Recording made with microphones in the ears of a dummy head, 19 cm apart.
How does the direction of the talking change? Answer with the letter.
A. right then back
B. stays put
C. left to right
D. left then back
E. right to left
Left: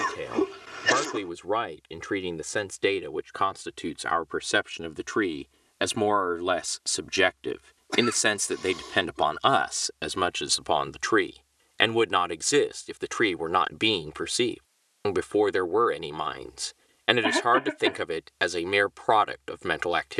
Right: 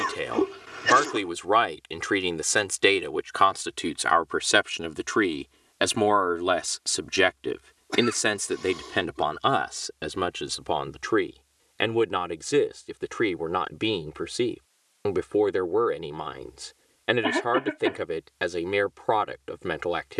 E.